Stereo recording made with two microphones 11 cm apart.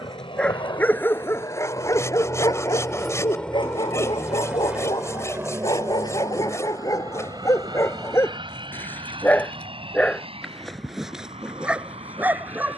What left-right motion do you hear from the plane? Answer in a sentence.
In this clip you hear the plane move to the right.